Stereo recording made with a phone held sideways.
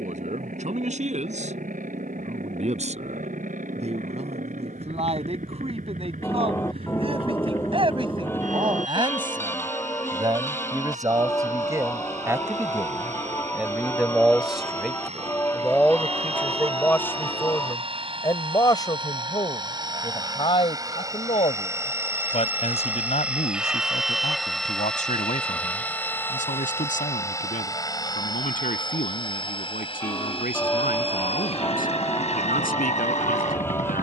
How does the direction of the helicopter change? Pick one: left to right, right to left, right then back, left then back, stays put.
right to left.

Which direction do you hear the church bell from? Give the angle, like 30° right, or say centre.
10° left.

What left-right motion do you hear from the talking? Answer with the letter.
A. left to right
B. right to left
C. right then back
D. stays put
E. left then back
B.